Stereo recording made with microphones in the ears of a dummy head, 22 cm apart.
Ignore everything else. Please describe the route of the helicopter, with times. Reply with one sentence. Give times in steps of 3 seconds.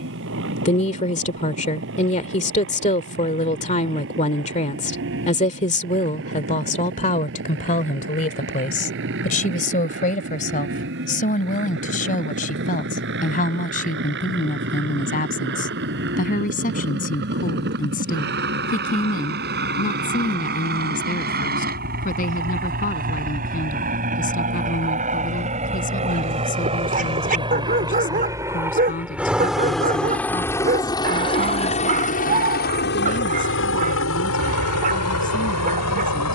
In this clip you hear the helicopter on the right from 0 s, in the centre from 27 s and on the left from 30 s.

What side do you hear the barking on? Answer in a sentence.
You can hear the barking on the right.